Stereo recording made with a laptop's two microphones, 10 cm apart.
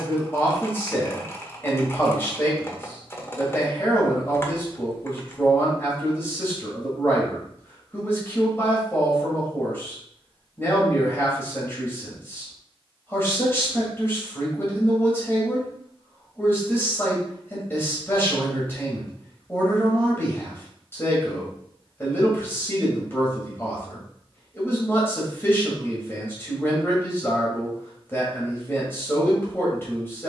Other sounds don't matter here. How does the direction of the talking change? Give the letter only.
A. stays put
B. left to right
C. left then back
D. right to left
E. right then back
A.